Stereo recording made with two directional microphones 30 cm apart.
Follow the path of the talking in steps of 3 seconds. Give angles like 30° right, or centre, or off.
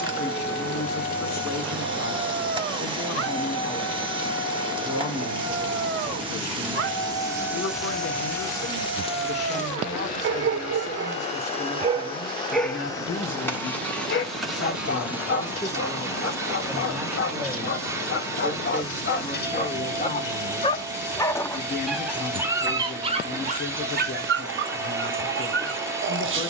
50° left, 50° left, 50° left, 50° left, 40° left, centre, 20° left, 50° left, 50° left.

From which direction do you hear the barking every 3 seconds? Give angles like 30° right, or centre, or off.
40° right, 40° right, 40° right, 40° right, 20° left, 50° left, 30° left, 10° right, 40° right.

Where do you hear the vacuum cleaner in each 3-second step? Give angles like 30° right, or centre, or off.
20° right, 20° right, centre, 20° left, 10° left, 10° right, 10° right, 10° right, 10° right.